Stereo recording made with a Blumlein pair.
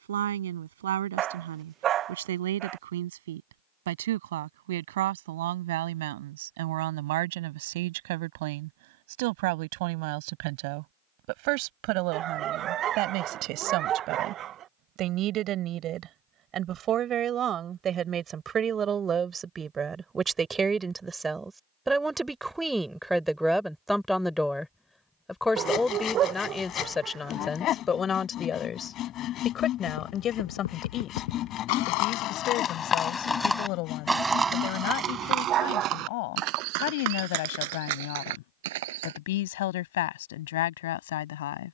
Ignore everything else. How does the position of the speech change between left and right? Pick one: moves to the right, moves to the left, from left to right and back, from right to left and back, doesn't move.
moves to the left.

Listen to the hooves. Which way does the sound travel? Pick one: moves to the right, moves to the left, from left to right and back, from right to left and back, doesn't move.
moves to the right.